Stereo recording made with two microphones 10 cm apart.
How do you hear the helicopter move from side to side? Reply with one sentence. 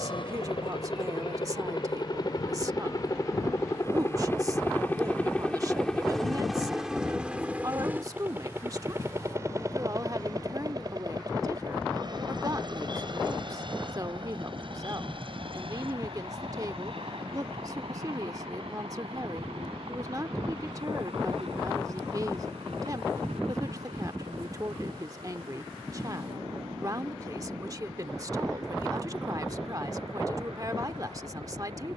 You can hear the helicopter go from the left side to the right.